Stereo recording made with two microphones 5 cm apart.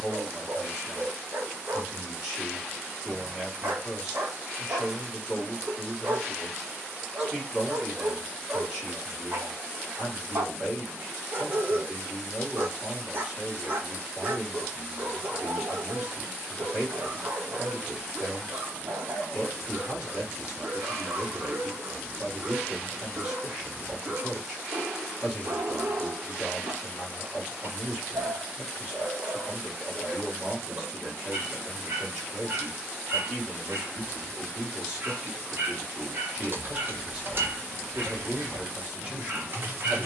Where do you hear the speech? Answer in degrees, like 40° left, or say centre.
20° right.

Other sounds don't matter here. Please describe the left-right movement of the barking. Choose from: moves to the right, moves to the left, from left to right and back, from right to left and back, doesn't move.
doesn't move.